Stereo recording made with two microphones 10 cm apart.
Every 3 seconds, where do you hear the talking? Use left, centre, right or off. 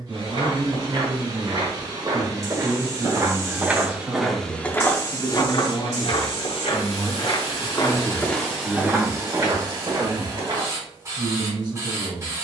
right, right, centre, right.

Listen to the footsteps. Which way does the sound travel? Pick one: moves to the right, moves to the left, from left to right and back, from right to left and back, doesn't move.
from right to left and back.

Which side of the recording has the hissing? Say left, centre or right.
right.